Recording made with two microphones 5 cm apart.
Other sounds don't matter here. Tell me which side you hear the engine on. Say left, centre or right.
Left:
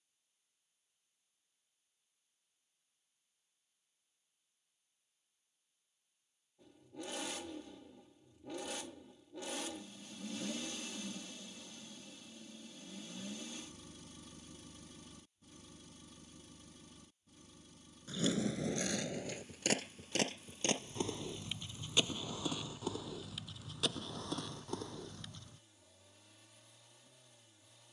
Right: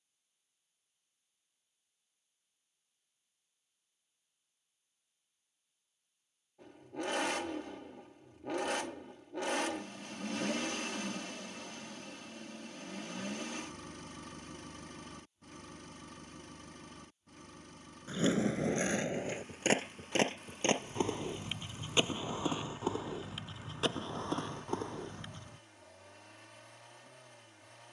right.